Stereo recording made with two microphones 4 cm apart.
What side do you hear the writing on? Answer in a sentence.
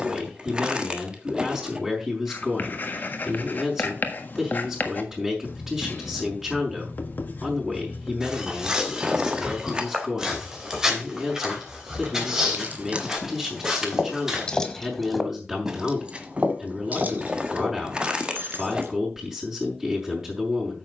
In this clip you hear the writing on the left.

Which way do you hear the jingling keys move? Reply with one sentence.
You can hear the jingling keys move from right to left and back again.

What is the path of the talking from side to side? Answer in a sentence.
In this clip you hear the talking stay put.